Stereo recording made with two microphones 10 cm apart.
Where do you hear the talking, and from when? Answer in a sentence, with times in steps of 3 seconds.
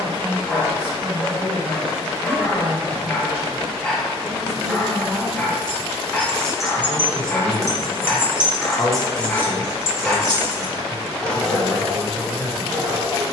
In this clip you hear the talking on the right from 0 s, in the centre from 3 s and on the left from 6 s.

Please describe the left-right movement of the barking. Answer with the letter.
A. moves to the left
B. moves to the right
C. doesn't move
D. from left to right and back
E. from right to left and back
C.